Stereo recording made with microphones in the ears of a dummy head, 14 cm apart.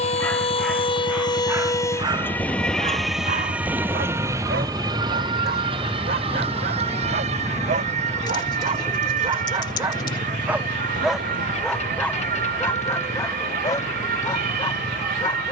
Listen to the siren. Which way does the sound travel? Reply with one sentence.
In this clip you hear the siren travel towards the right.